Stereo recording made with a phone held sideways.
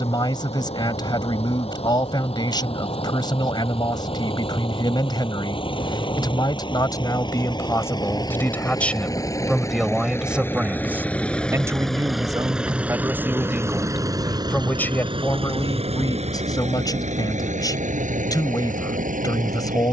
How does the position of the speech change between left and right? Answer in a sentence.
In this clip you hear the speech move from left to right and back again.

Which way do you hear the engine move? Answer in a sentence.
In this clip you hear the engine move to the right.